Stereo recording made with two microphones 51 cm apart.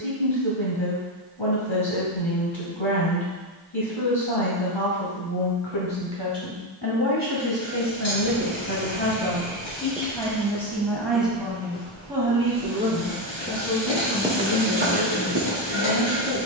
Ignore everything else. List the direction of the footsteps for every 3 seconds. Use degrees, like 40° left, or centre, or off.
off, off, 40° right, 20° left, 20° left, 30° right.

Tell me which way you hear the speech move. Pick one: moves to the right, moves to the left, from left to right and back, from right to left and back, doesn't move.
moves to the right.